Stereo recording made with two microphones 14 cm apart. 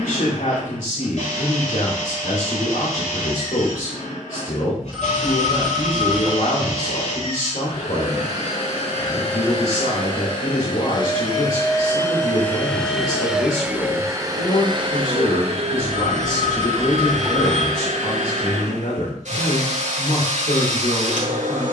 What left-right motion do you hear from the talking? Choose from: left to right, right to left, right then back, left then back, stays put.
stays put.